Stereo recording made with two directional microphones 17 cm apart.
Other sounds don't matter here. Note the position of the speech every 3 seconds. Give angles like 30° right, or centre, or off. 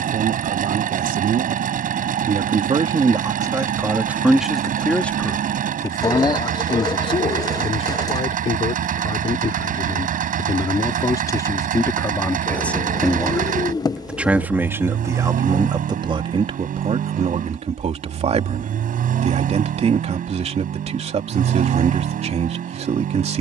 50° right, 10° right, 30° left, 30° left, centre, 30° right, 40° right, 40° right.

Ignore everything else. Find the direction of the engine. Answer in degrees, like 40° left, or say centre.
50° right.